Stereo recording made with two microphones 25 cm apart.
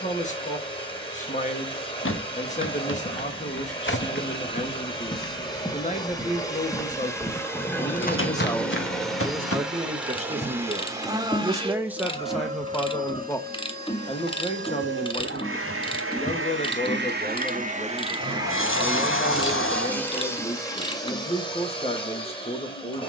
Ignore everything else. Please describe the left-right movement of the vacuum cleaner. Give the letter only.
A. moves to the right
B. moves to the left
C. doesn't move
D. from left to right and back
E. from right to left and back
D.